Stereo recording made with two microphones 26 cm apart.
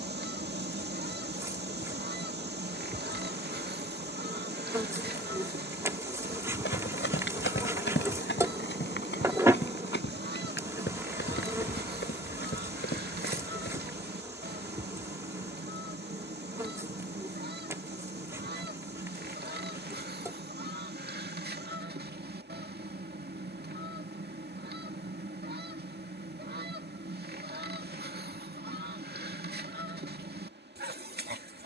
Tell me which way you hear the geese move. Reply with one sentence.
In this clip you hear the geese stay in one place.